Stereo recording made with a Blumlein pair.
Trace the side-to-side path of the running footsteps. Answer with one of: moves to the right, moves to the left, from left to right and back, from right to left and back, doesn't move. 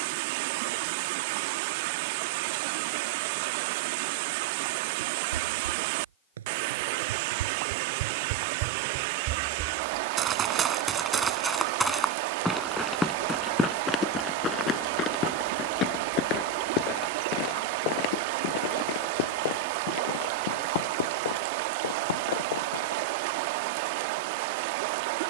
moves to the left.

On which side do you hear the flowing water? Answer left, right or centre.
right.